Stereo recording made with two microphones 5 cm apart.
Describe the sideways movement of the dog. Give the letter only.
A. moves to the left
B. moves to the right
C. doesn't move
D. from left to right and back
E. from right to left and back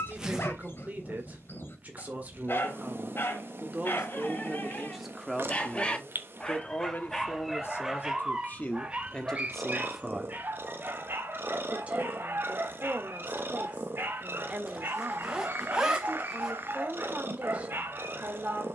B.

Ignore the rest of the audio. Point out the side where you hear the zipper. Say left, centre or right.
centre.